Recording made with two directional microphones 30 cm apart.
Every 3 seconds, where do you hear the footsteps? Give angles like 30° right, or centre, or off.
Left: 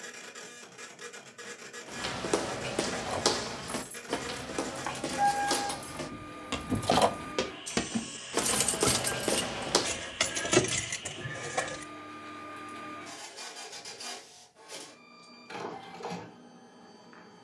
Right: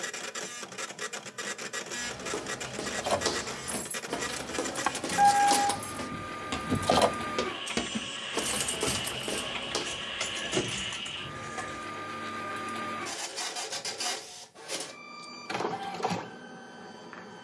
50° left, 10° left, 10° left, 40° left, off, off.